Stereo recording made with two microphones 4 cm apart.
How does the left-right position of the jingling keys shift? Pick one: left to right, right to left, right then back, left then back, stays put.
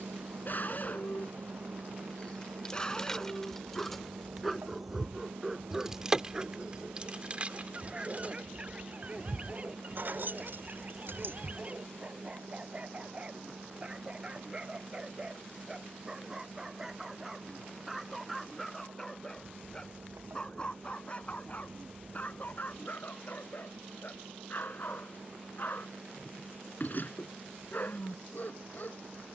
left to right.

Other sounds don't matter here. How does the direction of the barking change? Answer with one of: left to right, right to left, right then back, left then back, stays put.
right then back.